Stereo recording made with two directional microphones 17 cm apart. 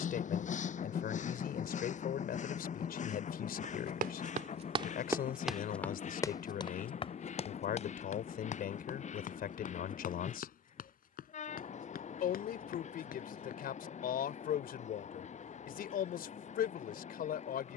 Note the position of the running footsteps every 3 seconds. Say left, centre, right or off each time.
off, right, left, left, left, off.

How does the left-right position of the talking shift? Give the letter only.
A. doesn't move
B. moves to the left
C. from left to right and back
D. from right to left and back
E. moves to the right
A.